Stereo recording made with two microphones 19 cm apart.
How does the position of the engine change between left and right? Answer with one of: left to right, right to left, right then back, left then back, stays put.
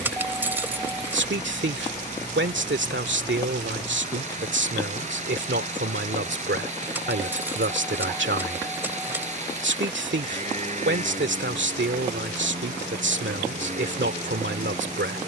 stays put.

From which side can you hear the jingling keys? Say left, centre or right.
centre.